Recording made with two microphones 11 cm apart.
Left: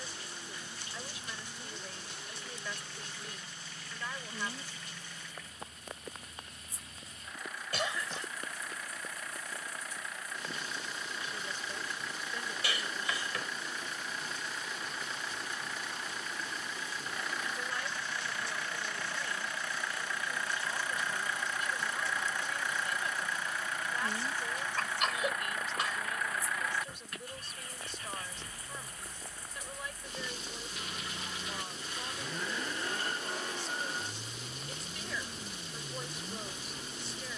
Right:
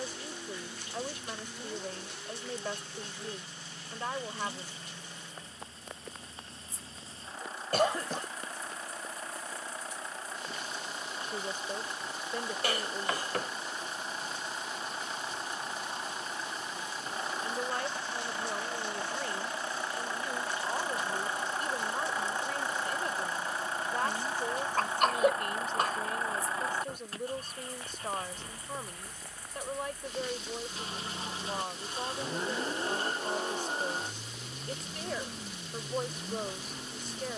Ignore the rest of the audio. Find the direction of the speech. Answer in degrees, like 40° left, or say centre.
40° right.